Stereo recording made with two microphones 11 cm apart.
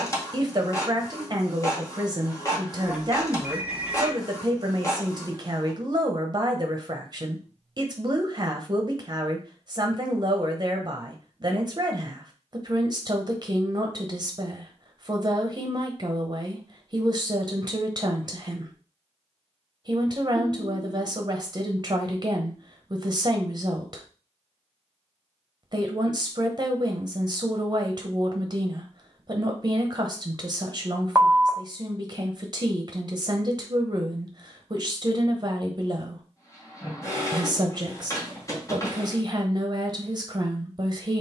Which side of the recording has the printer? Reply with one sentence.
In this clip you hear the printer on the left.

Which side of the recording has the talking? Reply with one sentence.
In this clip you hear the talking on the right.